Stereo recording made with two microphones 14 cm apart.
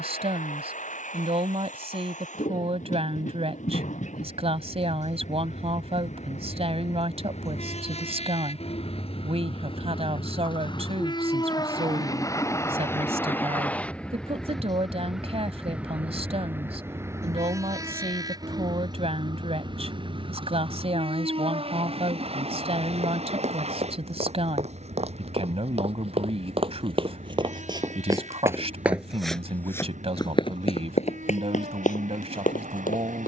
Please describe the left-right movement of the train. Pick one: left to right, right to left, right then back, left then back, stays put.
left to right.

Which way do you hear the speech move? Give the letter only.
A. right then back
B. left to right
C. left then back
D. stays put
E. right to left
D.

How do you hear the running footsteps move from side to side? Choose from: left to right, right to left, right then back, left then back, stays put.
right to left.